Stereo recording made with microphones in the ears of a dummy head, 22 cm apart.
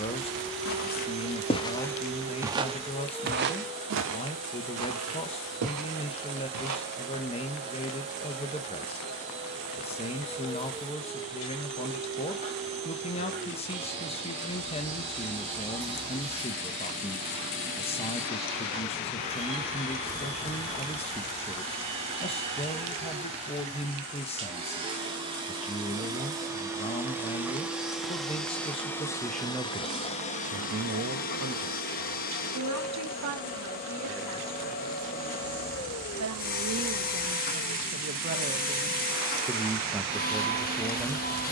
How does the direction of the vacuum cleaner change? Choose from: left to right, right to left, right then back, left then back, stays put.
right to left.